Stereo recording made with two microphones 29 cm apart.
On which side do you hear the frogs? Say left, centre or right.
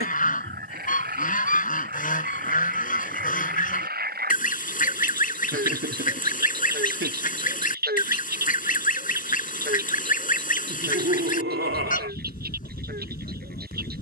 right.